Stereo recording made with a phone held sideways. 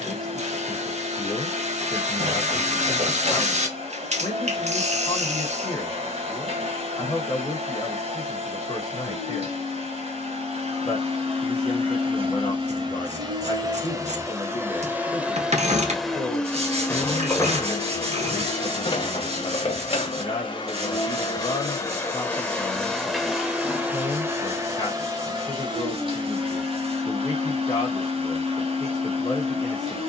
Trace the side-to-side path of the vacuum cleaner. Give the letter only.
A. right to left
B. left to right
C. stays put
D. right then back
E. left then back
E.